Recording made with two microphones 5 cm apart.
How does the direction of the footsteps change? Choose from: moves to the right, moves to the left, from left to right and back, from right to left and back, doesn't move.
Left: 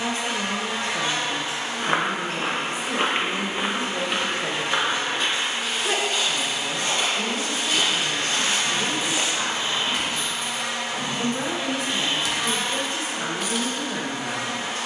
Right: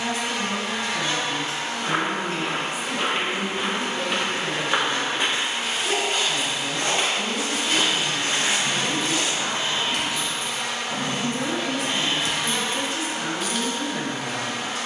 from left to right and back.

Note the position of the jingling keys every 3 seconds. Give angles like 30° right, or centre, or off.
off, off, 10° right, 60° right, 10° right.